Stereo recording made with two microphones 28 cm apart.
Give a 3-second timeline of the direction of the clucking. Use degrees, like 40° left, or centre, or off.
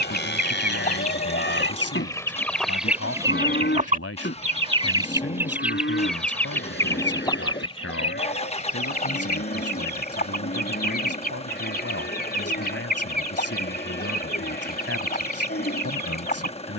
20° left, 10° right, 20° left, 30° left, 30° left, 30° left.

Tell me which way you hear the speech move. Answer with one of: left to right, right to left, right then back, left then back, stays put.
stays put.